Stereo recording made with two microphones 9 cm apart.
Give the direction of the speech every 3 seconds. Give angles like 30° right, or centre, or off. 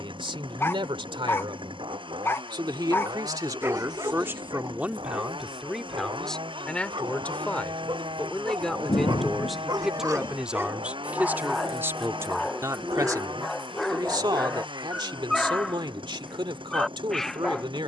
70° right, 20° right, 10° left, 10° right, 40° right, 70° right.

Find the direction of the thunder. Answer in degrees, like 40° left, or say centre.
50° left.